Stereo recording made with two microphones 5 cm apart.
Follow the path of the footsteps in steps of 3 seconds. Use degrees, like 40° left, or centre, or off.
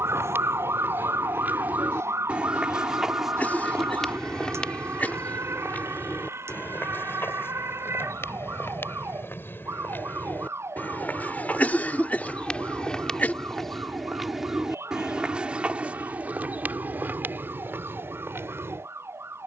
40° right, 20° left, 50° left, 40° left, 10° left, 30° right, 50° right.